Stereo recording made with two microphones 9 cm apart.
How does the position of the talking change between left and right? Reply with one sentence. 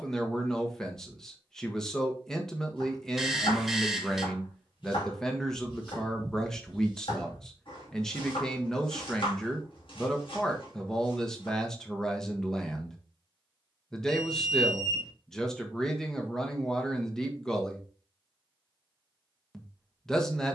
In this clip you hear the talking stay in one place.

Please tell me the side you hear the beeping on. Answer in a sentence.
You can hear the beeping in the centre.